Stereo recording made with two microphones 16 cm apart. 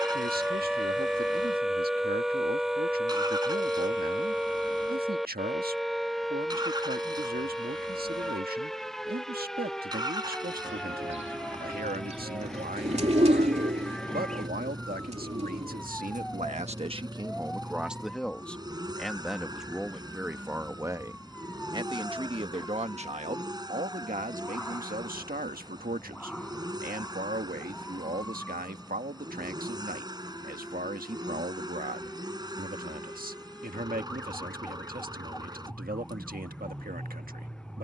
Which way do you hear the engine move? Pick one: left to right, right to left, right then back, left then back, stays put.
stays put.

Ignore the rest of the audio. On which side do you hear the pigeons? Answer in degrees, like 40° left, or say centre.
40° right.